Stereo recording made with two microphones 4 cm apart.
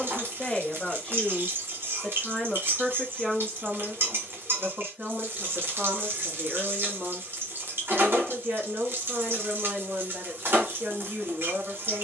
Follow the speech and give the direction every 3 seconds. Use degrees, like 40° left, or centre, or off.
10° left, 20° right, 40° right, 50° right.